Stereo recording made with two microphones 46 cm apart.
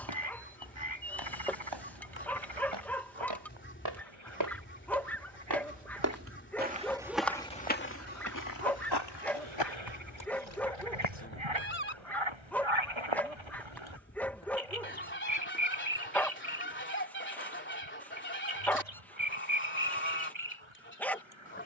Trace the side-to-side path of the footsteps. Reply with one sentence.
In this clip you hear the footsteps move to the left.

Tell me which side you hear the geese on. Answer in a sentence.
You can hear the geese on the left.